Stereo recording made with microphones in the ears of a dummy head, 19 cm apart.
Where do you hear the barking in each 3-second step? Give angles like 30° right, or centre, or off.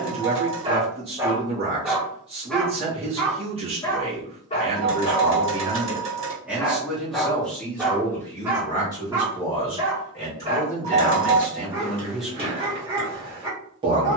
10° right, 20° left, centre, 20° right, 20° right.